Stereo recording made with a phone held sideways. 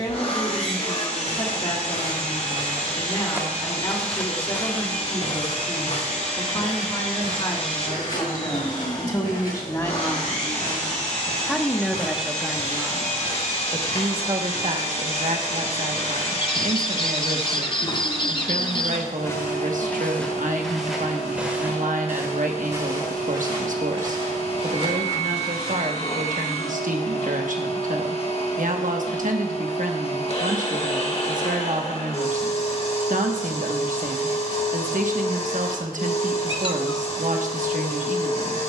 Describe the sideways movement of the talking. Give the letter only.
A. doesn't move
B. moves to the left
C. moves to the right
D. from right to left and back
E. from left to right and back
C.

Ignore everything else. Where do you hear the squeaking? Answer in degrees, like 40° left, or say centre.
30° left.